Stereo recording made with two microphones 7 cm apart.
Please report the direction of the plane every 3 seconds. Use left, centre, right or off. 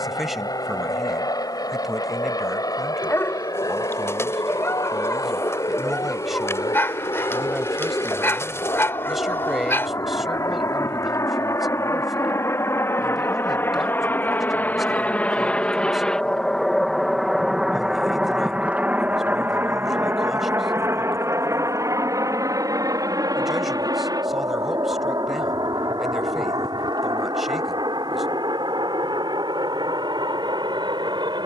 left, left, left, left, left, centre, right, right, right, right, right.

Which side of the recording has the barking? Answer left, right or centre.
left.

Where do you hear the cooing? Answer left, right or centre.
left.